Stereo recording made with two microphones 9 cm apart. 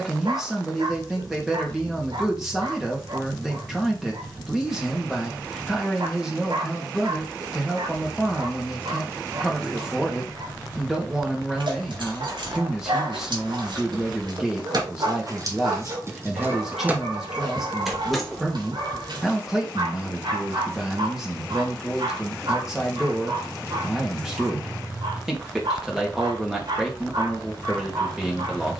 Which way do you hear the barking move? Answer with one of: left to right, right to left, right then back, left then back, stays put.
stays put.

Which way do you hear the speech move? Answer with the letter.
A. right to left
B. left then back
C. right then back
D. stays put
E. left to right
D.